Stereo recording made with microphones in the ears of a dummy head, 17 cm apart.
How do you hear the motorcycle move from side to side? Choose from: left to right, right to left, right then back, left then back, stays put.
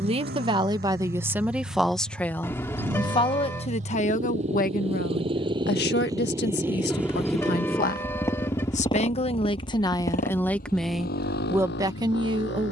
right to left.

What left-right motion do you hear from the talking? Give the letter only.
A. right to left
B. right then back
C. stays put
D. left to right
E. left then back
E.